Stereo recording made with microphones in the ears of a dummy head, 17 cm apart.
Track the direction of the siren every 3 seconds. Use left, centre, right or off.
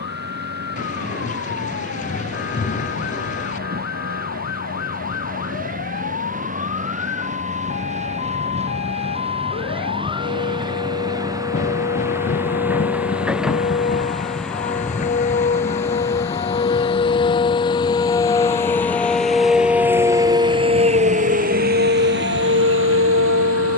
left, left, left, left, left, left, centre, right.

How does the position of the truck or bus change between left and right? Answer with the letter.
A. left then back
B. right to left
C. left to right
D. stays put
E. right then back
B.